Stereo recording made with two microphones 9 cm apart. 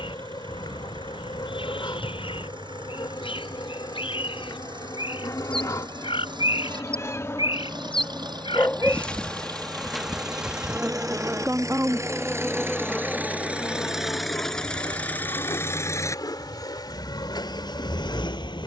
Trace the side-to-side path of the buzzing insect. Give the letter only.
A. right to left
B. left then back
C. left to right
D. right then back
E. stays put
D.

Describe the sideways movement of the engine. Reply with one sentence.
You can hear the engine move to the left.